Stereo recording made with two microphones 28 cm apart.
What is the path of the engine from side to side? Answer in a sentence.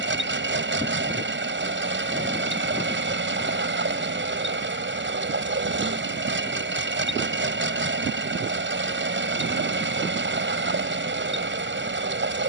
You can hear the engine stay in one place.